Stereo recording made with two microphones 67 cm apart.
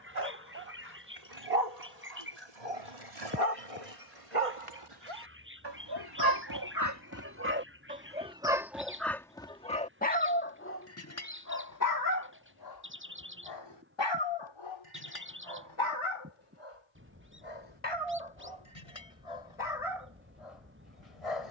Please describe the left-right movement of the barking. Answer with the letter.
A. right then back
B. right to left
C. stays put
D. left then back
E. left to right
B.